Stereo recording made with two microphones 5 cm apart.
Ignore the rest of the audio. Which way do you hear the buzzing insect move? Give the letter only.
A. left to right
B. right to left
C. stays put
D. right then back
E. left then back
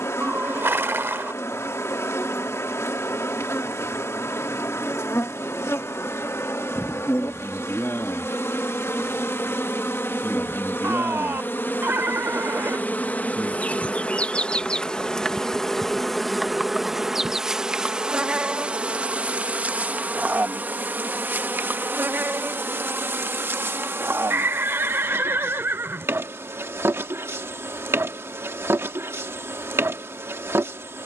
A.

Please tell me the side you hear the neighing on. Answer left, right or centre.
right.